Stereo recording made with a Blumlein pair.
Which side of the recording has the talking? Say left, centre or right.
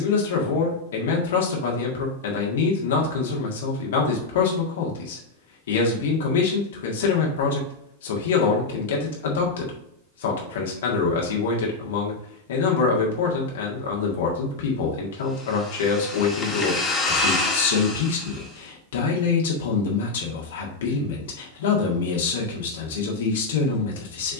left.